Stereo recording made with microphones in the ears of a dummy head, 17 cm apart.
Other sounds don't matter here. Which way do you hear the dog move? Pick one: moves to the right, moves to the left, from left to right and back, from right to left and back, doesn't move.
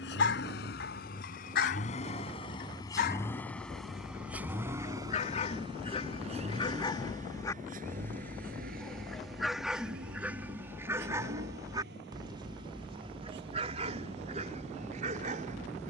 moves to the right.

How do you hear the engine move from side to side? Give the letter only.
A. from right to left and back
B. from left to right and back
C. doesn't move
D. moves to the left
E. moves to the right
E.